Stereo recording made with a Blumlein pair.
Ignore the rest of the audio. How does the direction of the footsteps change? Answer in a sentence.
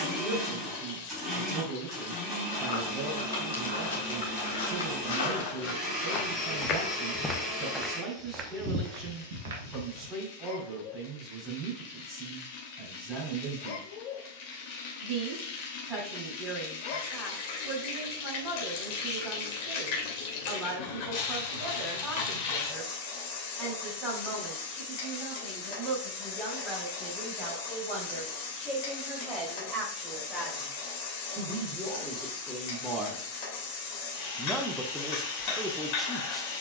You can hear the footsteps go from the left side to the right.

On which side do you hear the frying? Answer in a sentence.
You can hear the frying on the left.